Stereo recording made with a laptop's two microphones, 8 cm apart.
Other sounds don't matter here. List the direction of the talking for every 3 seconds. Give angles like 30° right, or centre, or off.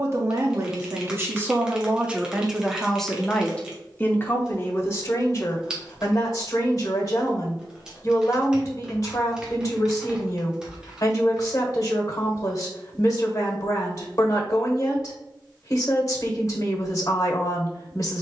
20° right, 30° left, 50° left, 50° left, 50° left, 50° left.